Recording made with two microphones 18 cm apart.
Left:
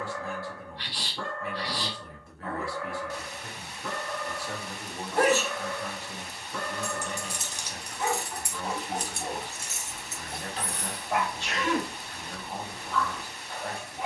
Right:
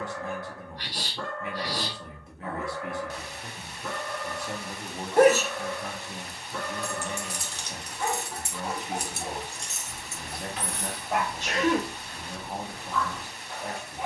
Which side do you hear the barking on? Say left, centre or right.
centre.